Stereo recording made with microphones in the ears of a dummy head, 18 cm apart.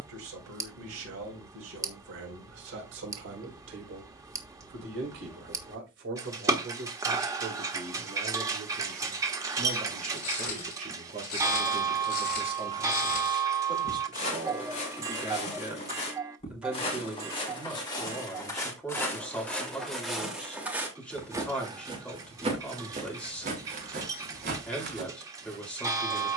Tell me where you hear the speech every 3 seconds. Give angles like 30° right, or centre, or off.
70° right, 70° right, 60° right, 40° right, 20° right, 10° right, 10° left, 10° left, 10° left.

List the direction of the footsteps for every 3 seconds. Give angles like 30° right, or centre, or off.
off, off, off, 50° left, 40° left, 30° left, 10° left, 30° right, 60° right.